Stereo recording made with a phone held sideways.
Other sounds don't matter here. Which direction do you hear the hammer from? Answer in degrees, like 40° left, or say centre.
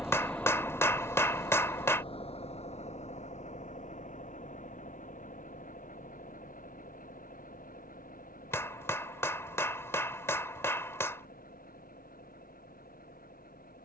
20° left.